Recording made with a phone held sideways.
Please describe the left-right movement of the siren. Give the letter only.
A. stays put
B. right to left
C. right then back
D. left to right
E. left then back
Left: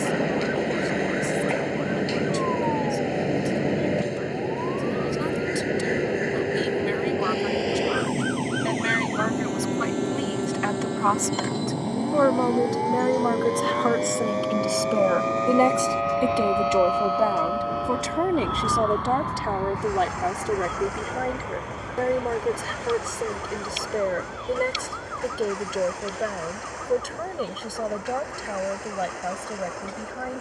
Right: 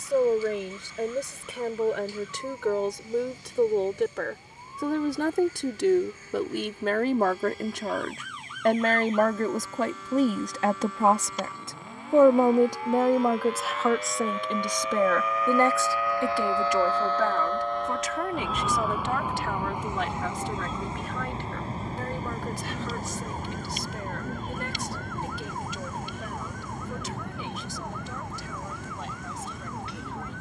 D.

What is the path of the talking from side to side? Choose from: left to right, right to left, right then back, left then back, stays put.
right to left.